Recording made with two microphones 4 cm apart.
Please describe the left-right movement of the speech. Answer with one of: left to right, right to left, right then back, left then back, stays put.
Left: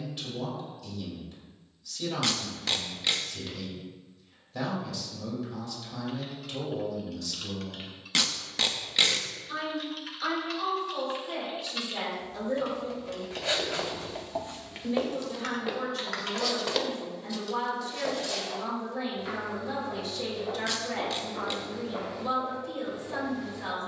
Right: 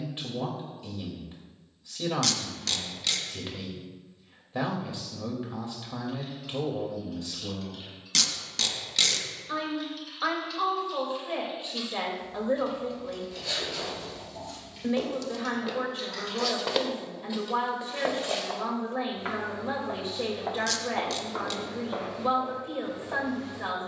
stays put.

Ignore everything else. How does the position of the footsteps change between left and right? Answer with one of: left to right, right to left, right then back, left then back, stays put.
left to right.